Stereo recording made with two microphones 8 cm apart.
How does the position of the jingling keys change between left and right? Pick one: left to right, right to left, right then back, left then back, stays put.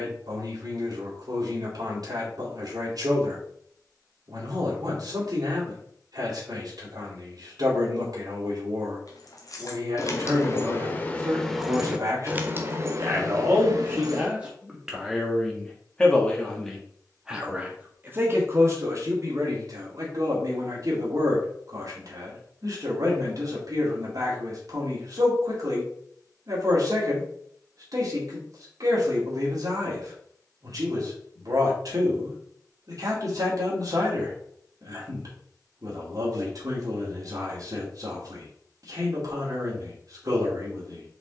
left to right.